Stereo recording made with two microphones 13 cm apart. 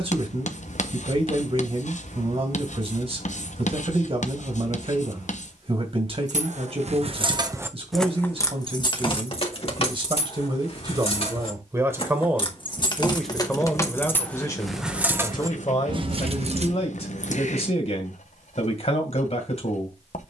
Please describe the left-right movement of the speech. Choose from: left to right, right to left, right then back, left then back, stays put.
right to left.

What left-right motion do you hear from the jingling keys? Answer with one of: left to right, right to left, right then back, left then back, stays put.
left then back.